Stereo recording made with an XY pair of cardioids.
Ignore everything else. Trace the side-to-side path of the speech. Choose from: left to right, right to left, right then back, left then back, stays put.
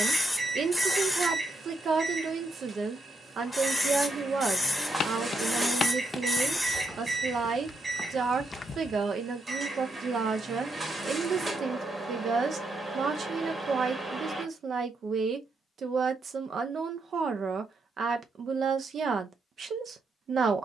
stays put.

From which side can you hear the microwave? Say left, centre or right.
right.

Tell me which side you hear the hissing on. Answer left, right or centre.
centre.